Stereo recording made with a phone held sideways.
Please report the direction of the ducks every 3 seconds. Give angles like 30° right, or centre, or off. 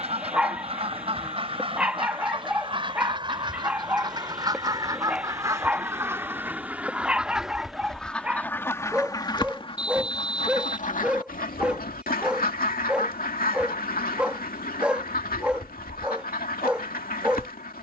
40° right, 30° right, centre, 50° left, 60° left, 60° left.